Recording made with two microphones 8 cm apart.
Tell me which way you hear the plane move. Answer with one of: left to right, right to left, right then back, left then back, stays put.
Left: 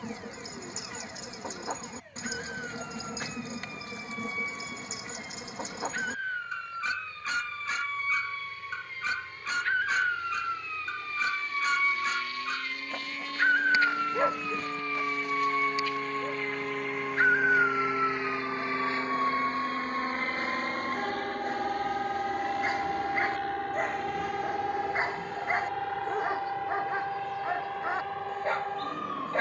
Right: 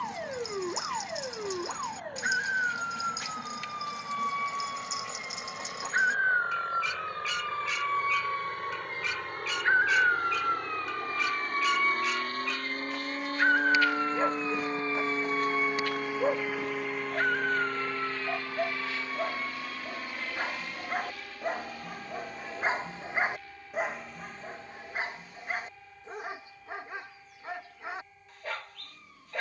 right to left.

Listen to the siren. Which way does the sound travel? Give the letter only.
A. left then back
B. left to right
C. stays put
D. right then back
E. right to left
E.